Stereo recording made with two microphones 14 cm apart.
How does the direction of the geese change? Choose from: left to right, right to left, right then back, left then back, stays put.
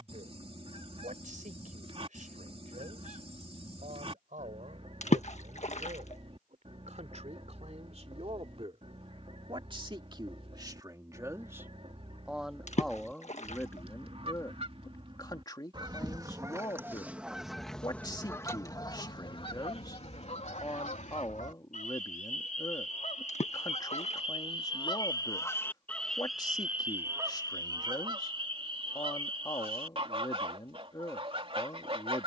left then back.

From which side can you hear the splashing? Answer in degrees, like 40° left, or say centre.
50° left.